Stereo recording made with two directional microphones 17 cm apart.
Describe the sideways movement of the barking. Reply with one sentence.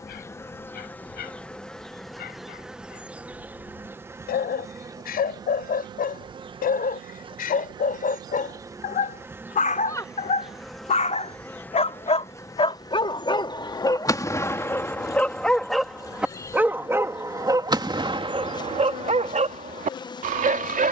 In this clip you hear the barking move from left to right.